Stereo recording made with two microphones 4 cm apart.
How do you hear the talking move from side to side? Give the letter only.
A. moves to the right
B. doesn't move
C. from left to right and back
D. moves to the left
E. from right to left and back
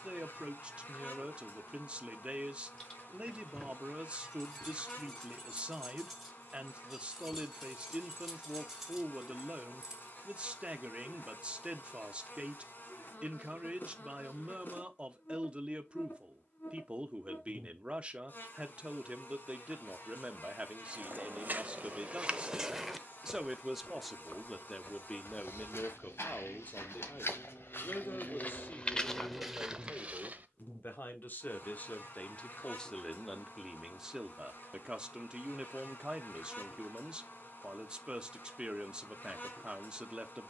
E.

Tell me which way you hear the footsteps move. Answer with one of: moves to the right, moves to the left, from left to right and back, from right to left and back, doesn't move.
from right to left and back.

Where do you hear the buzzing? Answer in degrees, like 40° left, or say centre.
50° left.